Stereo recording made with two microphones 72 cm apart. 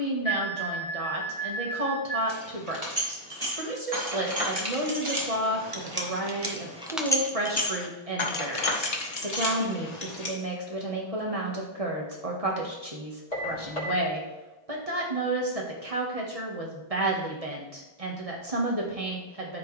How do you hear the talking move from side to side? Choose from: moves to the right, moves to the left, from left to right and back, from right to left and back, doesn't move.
doesn't move.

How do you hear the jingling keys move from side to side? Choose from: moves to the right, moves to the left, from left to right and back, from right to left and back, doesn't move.
moves to the left.